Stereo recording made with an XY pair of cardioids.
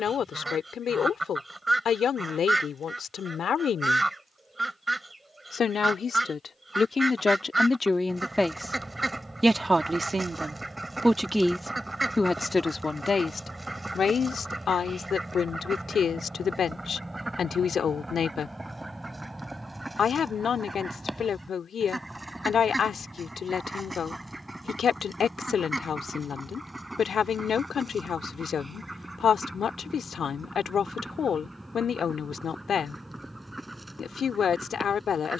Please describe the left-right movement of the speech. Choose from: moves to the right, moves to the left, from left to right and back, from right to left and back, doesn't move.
from left to right and back.